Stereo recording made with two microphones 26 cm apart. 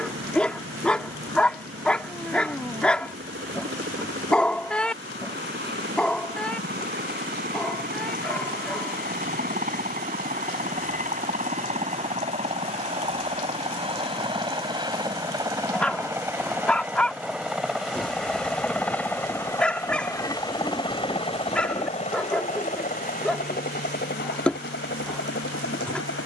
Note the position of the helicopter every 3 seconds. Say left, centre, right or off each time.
right, right, right, right, right, centre, centre, left, left.